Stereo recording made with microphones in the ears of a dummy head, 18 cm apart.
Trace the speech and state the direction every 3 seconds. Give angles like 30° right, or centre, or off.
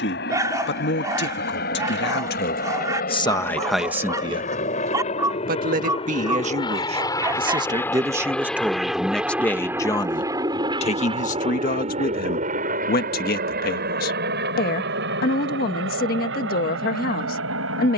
50° left, 10° right, 20° right, 30° left, 50° left, 50° left.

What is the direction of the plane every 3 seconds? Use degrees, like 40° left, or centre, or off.
50° left, 40° left, 10° left, 20° right, 40° right, 60° right.